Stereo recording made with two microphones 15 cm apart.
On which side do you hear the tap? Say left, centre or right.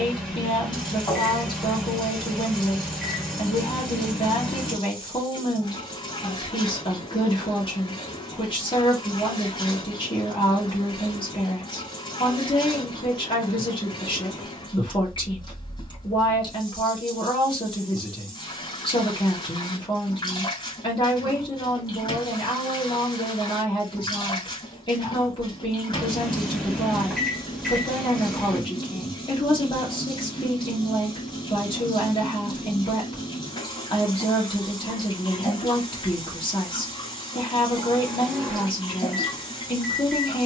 left.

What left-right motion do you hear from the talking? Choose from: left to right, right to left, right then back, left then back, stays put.
stays put.